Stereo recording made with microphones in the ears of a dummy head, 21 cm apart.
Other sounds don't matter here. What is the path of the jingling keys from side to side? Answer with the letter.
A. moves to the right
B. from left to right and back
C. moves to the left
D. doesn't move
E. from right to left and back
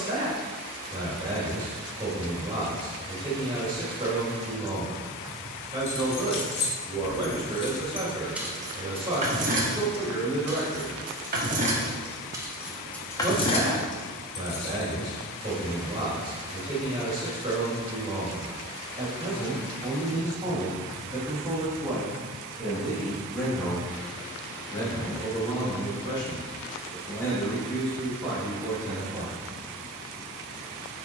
B.